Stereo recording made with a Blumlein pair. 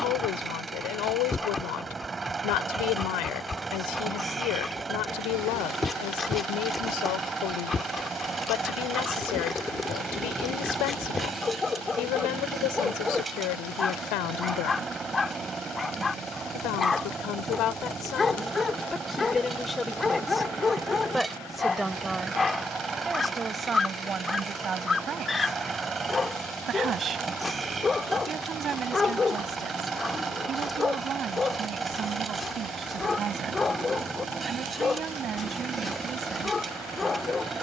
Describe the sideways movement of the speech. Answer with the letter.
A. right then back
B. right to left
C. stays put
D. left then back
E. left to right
E.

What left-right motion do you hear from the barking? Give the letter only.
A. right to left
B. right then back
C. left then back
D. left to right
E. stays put
E.